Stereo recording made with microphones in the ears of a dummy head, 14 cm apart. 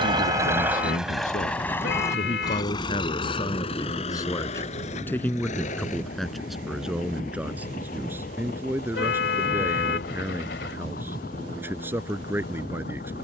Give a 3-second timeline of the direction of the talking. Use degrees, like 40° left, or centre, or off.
50° left, 20° left, 10° right, 10° right, 10° right.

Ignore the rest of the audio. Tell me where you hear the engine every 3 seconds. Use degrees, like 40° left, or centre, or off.
centre, 40° left, 50° left, 60° left, 60° left.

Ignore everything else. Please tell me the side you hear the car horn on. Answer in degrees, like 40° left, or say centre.
80° left.